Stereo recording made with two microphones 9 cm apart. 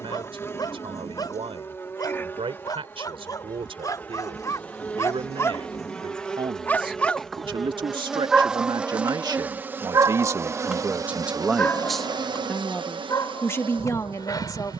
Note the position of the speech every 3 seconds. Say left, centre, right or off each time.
right, right, right, right, left.